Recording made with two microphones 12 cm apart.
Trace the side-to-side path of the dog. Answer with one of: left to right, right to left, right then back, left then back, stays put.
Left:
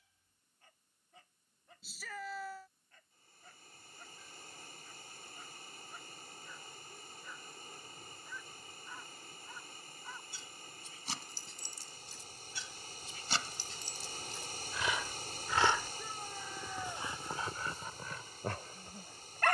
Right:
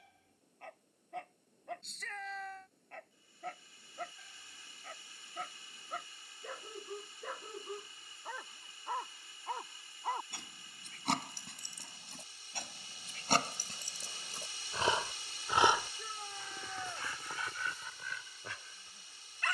right to left.